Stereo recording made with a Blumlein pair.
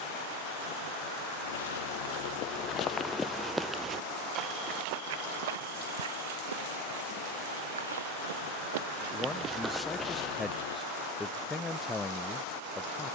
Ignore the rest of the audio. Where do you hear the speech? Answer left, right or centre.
centre.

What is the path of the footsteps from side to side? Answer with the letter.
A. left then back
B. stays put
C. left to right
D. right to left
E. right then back
E.